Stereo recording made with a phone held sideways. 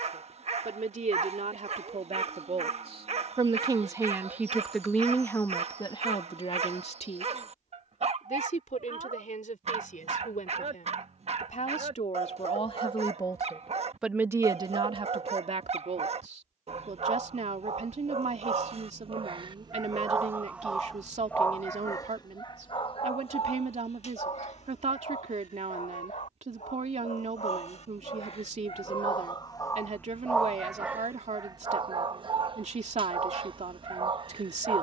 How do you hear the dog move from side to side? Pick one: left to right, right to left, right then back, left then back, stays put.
left then back.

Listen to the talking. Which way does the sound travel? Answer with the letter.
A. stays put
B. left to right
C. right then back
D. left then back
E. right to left
D.